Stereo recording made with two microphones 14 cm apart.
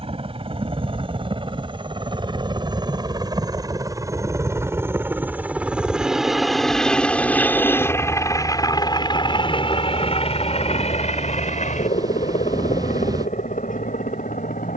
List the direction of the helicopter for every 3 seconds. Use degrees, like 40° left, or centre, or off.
40° right, 20° right, 10° left, 40° left, 60° left.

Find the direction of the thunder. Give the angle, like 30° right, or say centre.
30° right.